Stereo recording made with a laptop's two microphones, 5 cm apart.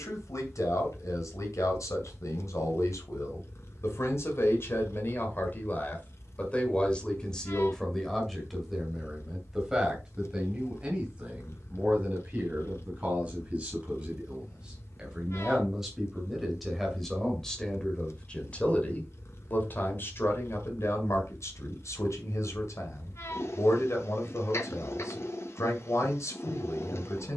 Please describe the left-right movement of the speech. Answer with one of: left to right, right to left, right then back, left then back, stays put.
right then back.